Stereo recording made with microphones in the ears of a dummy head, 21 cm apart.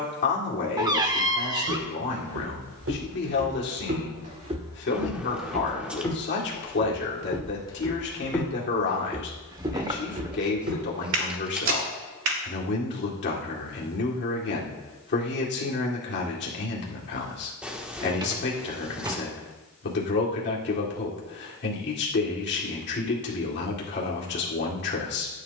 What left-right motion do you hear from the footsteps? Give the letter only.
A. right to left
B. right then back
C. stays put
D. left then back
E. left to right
D.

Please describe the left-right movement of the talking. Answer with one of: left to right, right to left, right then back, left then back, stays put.
stays put.